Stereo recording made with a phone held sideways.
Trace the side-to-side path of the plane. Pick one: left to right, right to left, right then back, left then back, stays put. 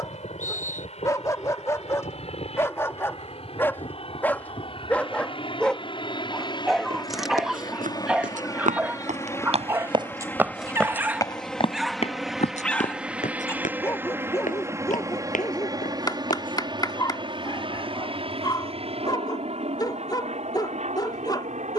left to right.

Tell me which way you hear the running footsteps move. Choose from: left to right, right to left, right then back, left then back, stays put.
right to left.